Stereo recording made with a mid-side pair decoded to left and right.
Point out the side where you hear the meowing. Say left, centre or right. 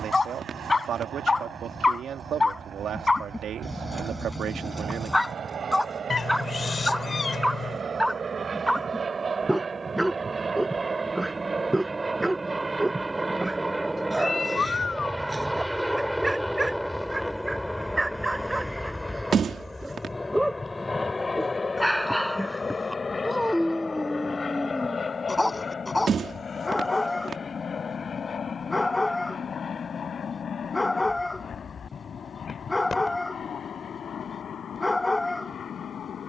left.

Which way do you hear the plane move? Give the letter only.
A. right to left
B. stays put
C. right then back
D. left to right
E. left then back
A.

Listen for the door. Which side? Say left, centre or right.
right.